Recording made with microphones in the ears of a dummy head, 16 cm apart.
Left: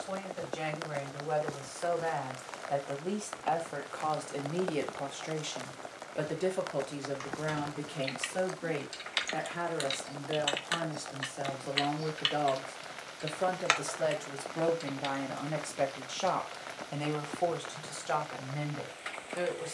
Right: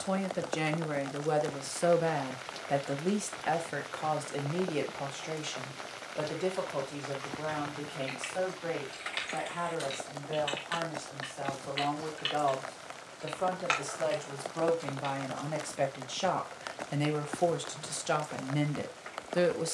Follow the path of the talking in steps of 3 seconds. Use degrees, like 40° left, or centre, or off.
50° right, centre, 20° left, 30° left, 20° left, 10° right, 50° right.